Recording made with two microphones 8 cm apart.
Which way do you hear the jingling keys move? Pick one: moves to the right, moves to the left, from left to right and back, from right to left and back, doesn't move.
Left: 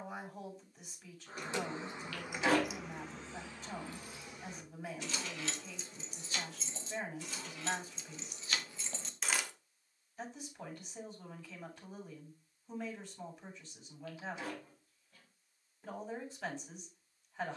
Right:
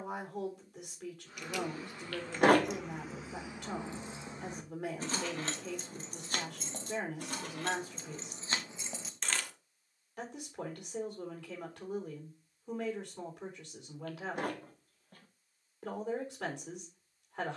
from left to right and back.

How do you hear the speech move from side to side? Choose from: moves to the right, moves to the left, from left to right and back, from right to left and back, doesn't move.
doesn't move.